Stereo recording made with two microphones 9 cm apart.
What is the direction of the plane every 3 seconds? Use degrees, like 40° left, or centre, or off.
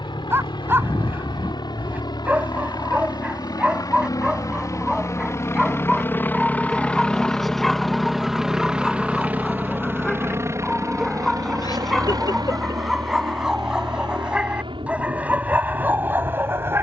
60° left, 40° left, 10° left, 30° right, 50° right, 60° right.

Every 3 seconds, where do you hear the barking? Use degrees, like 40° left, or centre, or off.
20° right, 10° right, centre, centre, 10° right, 20° right.